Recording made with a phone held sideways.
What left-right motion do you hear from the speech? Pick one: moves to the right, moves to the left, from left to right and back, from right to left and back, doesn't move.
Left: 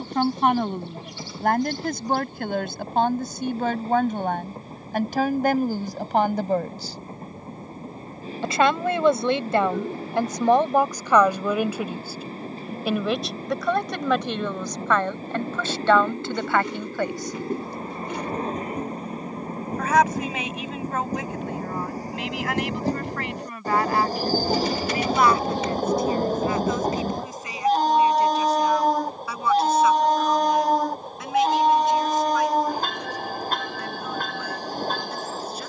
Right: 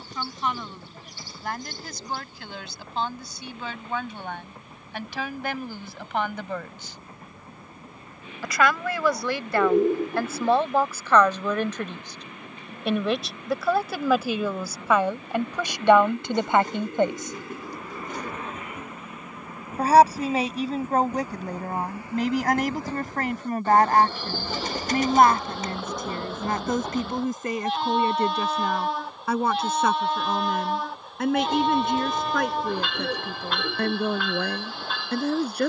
moves to the right.